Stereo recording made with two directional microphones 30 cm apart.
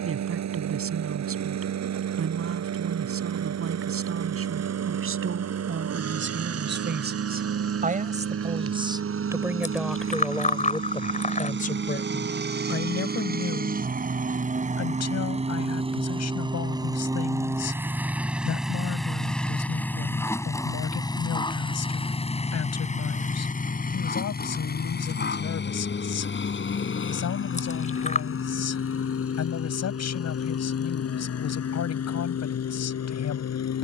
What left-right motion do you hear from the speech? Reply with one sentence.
You can hear the speech move from right to left.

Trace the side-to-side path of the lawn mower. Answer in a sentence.
In this clip you hear the lawn mower move to the left.